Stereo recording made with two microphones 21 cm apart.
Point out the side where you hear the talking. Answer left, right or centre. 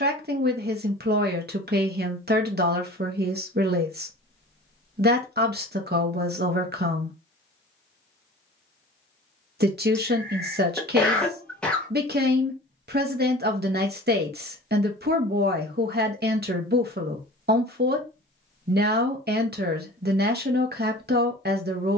right.